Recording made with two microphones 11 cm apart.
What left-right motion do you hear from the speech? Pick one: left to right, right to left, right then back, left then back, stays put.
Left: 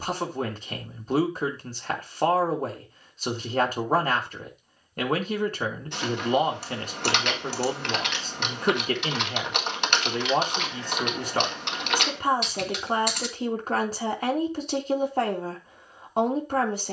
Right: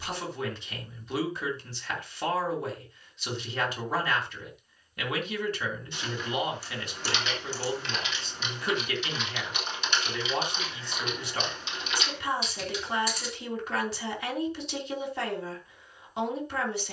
stays put.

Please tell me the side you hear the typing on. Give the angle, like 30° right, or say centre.
70° left.